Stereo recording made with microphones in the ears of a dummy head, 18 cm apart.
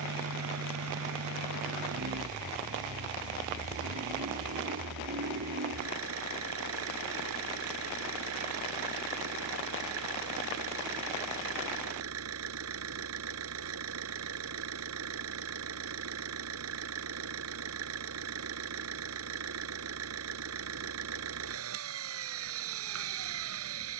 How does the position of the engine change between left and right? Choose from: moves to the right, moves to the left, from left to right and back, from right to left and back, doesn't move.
doesn't move.